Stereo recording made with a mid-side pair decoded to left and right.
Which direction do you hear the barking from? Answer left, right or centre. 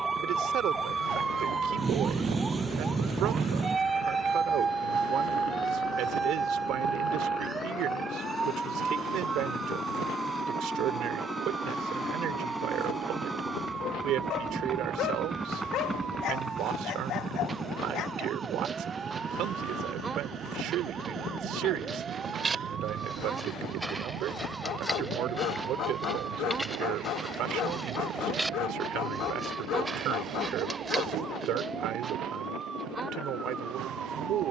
left.